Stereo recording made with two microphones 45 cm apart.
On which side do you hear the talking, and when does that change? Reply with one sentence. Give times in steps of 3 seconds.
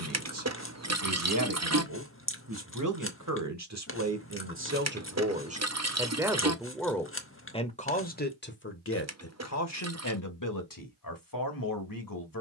You can hear the talking on the right from 0 s, in the centre from 6 s and on the left from 9 s.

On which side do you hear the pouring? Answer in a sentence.
In this clip you hear the pouring on the right.